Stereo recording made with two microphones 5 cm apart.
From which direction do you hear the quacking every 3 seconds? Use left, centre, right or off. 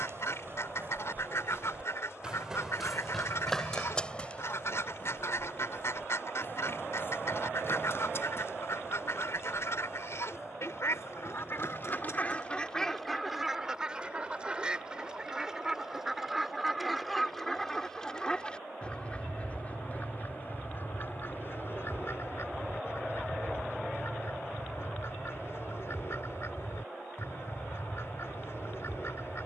left, left, left, left, centre, centre, left, left, left, left.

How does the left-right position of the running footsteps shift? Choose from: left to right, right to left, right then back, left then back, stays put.
right to left.